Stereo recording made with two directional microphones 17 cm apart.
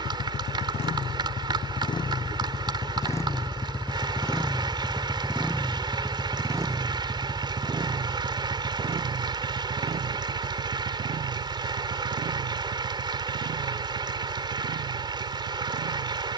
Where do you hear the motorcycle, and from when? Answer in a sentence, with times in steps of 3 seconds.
In this clip you hear the motorcycle on the left from 0 s, in the centre from 3 s and on the right from 6 s.